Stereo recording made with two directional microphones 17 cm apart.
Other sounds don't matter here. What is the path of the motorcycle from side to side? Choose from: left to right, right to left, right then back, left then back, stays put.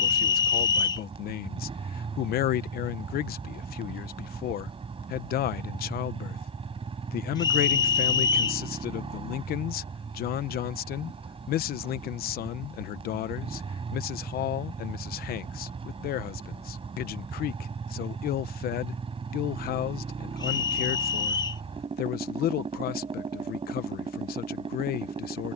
stays put.